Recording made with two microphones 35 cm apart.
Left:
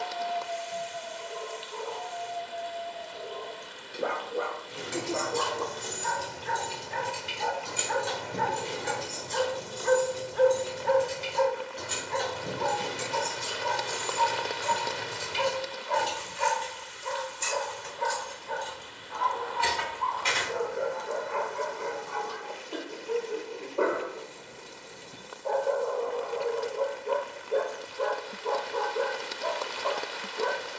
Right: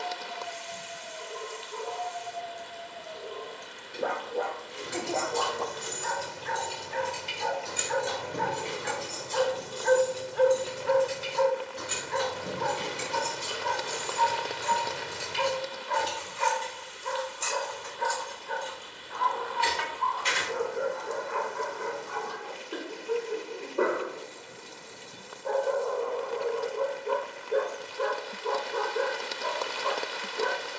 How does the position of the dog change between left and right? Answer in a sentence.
In this clip you hear the dog move from right to left and back again.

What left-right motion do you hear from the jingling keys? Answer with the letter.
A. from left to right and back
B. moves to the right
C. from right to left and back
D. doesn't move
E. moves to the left
A.